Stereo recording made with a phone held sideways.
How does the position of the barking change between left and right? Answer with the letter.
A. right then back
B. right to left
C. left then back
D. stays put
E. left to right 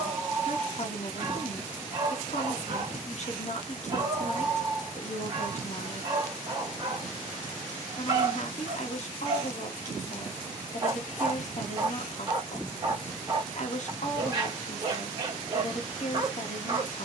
D.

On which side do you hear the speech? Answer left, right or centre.
left.